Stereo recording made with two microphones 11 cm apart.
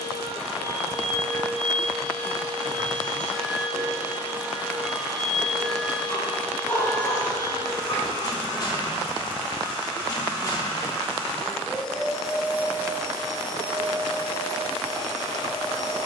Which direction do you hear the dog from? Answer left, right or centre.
left.